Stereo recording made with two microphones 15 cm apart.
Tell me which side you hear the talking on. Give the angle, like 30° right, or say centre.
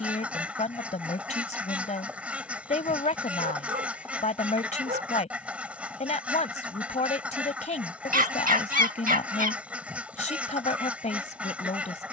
50° left.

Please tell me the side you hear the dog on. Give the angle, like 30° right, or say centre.
60° right.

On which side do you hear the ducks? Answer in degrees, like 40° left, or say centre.
10° right.